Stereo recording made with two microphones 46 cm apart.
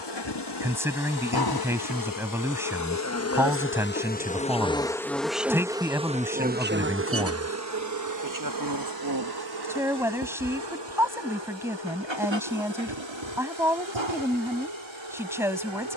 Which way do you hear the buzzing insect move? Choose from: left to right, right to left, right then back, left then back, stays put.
left to right.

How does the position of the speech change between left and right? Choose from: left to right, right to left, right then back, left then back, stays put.
stays put.